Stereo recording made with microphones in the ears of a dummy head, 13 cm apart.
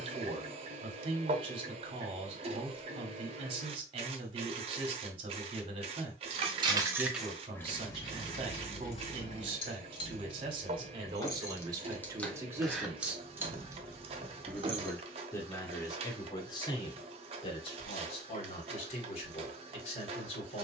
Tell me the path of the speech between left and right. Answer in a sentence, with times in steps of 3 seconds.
In this clip you hear the speech on the right from 0 s, in the centre from 12 s and on the left from 15 s.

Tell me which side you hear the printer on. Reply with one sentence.
In this clip you hear the printer on the right.